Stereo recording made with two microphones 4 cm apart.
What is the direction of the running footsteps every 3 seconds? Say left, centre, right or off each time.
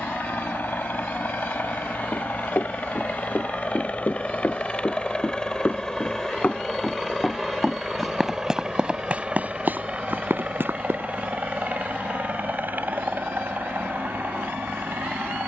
left, left, centre, right, off.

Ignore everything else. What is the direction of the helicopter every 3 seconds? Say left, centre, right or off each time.
left, left, centre, right, right.